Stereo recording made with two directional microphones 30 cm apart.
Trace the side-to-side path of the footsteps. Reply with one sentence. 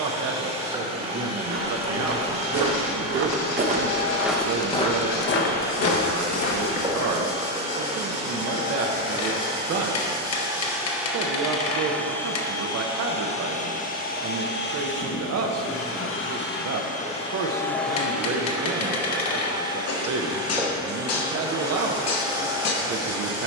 You can hear the footsteps travel towards the left.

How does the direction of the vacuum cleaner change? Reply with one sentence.
In this clip you hear the vacuum cleaner go left and come back.